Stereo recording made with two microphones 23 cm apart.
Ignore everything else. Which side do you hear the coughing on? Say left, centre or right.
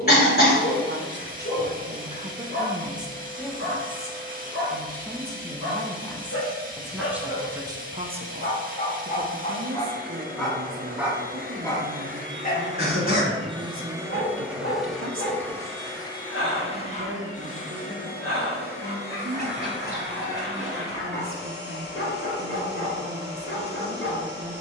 left.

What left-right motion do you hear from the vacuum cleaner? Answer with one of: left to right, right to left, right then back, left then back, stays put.
right to left.